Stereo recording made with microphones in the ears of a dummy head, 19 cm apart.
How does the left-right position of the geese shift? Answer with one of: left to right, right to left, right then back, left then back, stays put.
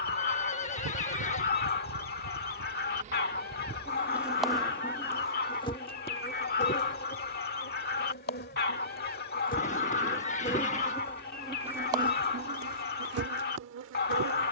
stays put.